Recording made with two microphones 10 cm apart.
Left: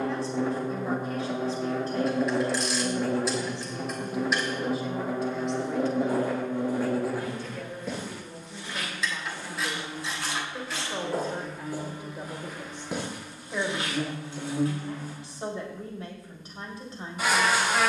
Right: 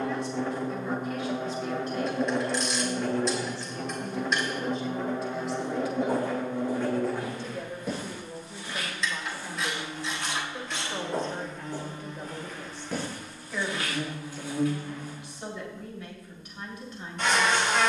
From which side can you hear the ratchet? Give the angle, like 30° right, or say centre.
centre.